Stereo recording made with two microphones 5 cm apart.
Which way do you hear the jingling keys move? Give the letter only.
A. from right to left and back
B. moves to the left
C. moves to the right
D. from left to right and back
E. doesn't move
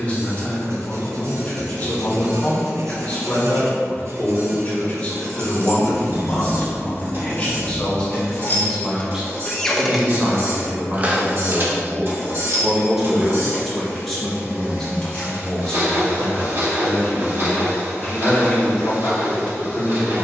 A.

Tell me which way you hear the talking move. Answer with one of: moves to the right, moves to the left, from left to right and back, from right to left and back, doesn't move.
from left to right and back.